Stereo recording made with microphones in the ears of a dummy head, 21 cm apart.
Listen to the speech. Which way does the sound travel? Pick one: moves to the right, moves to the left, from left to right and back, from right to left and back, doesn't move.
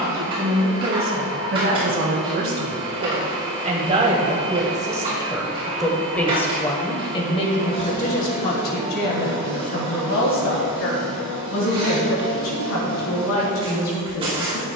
moves to the left.